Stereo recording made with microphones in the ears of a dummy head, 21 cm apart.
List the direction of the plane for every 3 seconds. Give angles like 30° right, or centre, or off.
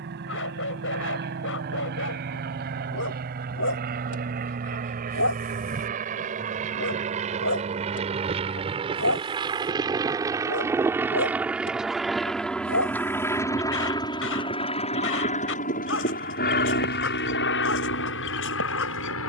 50° right, 40° right, 30° right, 10° right, 10° left, 40° left, 60° left.